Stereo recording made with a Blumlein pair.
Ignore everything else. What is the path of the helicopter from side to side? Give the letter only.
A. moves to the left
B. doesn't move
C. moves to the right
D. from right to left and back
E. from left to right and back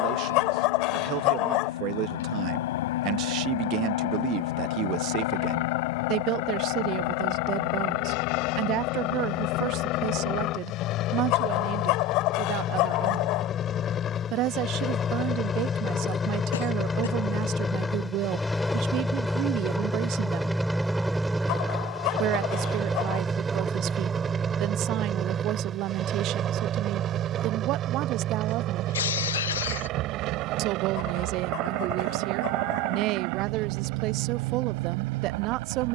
C.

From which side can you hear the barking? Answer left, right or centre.
left.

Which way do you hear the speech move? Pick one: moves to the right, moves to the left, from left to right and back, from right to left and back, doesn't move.
doesn't move.